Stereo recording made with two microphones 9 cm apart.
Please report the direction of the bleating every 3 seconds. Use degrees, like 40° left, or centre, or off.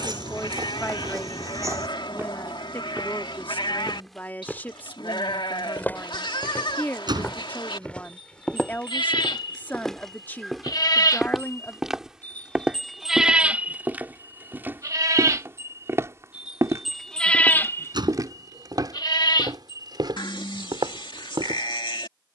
70° left, 70° left, 70° left, 50° left, 10° right, 10° right, 60° left, 70° left.